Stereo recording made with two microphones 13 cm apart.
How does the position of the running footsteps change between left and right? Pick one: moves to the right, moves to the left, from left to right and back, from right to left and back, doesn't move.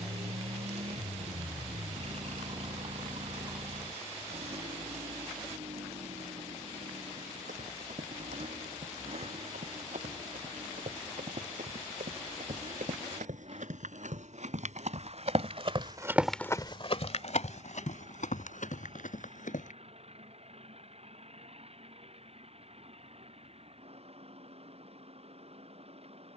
moves to the left.